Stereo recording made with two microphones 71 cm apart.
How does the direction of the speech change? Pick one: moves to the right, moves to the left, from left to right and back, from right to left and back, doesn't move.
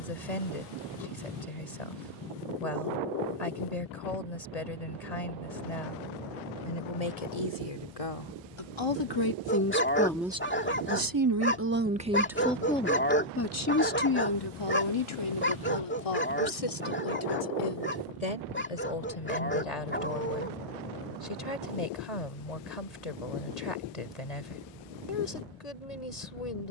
from left to right and back.